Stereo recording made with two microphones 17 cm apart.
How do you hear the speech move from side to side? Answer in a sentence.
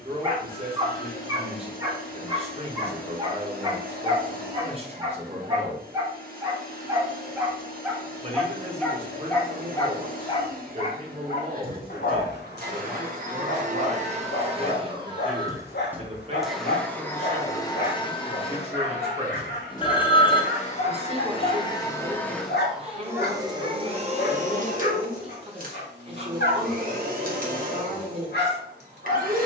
In this clip you hear the speech stay in one place.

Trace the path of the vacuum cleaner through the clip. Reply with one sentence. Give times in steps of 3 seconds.
You can hear the vacuum cleaner on the right from 0 s, in the centre from 15 s, on the left from 18 s, in the centre from 21 s and on the right from 24 s.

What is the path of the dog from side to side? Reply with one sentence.
You can hear the dog move to the left.